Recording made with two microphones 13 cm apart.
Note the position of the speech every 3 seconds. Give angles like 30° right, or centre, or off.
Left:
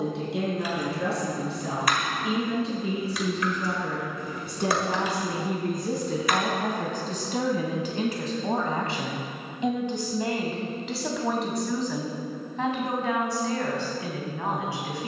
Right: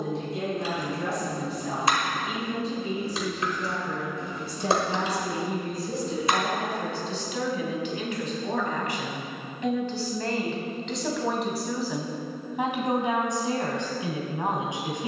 70° left, 60° left, 40° left, 10° left, 20° right.